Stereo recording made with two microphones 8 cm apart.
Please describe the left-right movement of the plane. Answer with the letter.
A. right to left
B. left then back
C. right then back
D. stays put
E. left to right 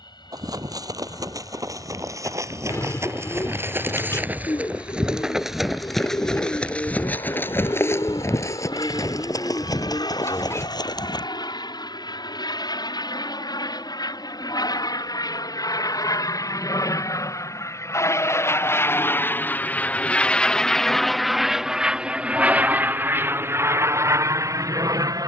E.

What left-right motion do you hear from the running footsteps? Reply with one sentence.
In this clip you hear the running footsteps travel towards the left.